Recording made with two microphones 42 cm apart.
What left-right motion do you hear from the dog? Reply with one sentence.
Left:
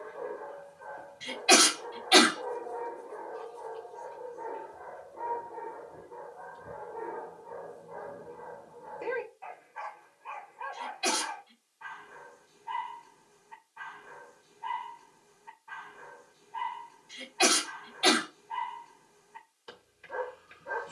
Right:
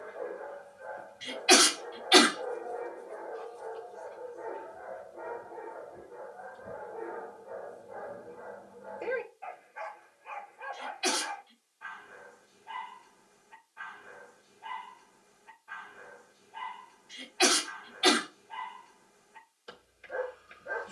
You can hear the dog stay in one place.